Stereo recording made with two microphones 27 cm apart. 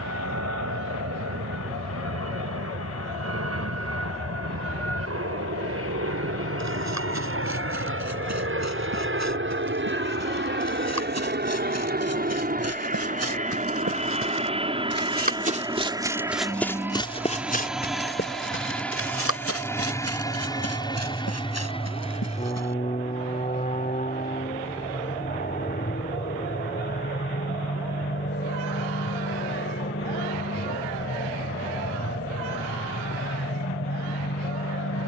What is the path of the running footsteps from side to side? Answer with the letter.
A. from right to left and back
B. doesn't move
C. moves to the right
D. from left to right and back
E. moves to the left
E.